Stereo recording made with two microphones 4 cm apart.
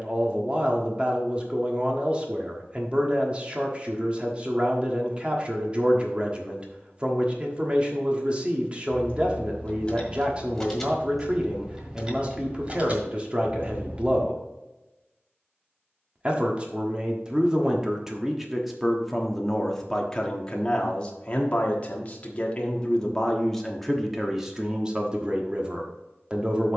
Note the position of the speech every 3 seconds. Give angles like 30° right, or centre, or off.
30° right, 30° right, 30° right, 30° right, 30° right, 20° right, 10° left, 20° left, 20° right.